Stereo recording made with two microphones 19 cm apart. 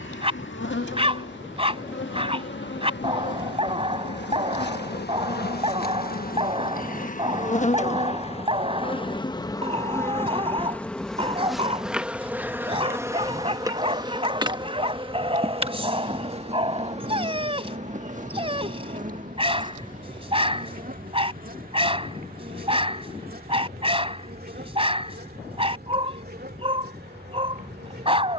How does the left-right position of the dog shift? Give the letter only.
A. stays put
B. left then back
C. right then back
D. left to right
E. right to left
A.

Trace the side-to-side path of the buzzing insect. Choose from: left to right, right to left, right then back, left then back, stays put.
left to right.